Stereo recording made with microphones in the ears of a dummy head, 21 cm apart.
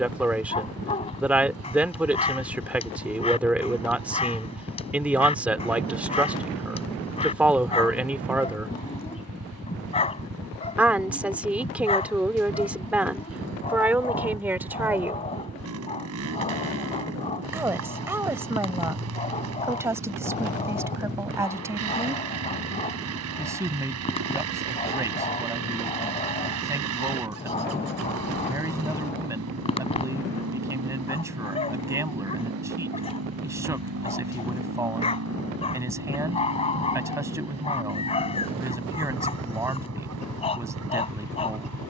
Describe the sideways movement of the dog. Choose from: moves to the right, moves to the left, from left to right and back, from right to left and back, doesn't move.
doesn't move.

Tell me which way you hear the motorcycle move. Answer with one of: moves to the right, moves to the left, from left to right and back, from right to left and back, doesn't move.
doesn't move.